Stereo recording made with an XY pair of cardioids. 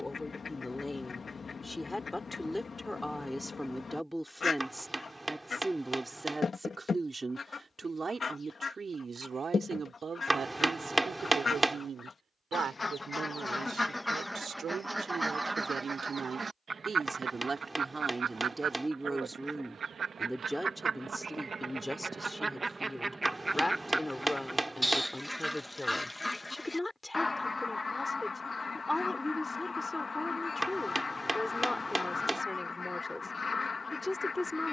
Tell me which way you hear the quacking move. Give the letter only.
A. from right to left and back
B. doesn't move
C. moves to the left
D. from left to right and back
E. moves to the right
D.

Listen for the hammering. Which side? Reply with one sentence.
In this clip you hear the hammering in the centre.